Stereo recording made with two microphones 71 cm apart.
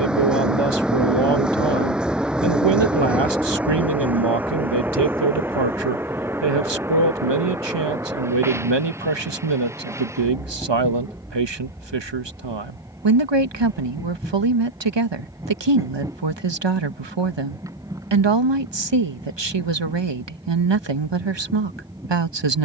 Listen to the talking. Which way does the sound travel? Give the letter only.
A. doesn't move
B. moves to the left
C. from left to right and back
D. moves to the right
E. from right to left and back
A.